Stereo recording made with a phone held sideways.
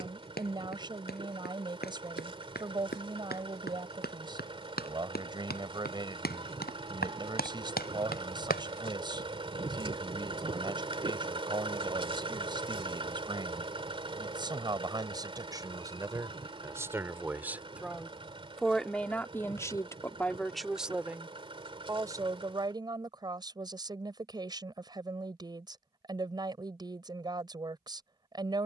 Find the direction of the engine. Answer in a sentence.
You can hear the engine on the right.